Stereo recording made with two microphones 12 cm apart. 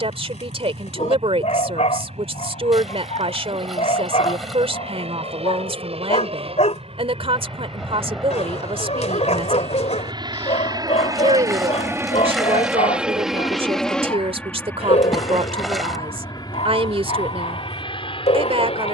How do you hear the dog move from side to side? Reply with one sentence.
In this clip you hear the dog stay in one place.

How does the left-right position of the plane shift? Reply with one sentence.
In this clip you hear the plane travel towards the left.